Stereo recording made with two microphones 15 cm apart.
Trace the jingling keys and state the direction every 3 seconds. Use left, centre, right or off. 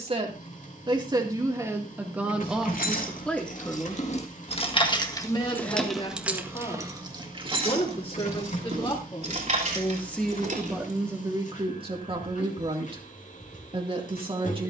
left, left, right, right, off.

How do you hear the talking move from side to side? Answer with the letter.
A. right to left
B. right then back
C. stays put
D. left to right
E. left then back
E.